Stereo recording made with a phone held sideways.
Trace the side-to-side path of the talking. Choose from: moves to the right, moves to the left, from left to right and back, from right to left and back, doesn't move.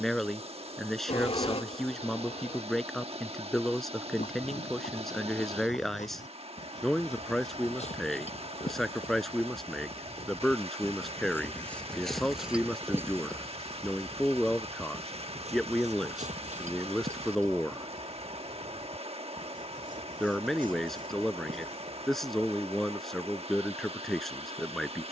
doesn't move.